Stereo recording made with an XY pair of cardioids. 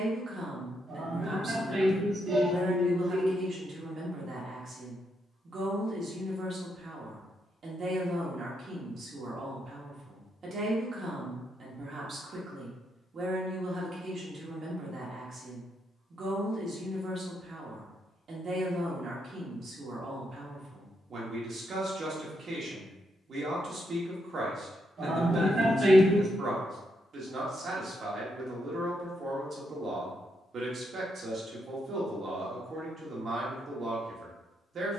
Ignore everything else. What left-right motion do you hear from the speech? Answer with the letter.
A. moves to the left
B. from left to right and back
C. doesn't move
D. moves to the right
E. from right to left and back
C.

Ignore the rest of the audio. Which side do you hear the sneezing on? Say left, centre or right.
right.